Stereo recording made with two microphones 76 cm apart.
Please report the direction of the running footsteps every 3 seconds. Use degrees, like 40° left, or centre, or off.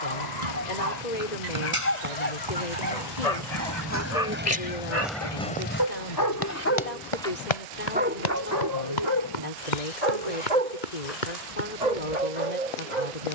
40° right, 10° right, 50° left, 80° left, off.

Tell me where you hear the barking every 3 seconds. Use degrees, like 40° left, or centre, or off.
60° left, 50° left, centre, 50° right, 70° right.